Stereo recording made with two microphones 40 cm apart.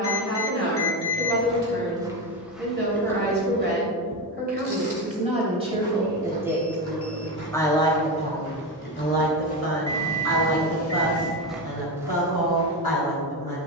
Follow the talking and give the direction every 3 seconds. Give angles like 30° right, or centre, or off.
30° right, 20° right, 10° left, 50° left, 60° left.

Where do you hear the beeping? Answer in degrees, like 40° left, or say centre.
30° left.